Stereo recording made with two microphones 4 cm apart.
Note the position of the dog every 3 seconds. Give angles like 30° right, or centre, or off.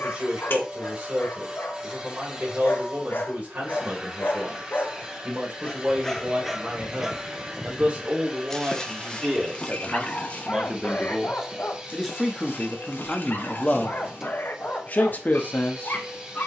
50° left, 40° left, centre, 30° left, 50° left, 50° left.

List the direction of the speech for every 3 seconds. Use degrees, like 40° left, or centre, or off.
40° right, 40° right, 30° right, 20° right, 10° left, 40° left.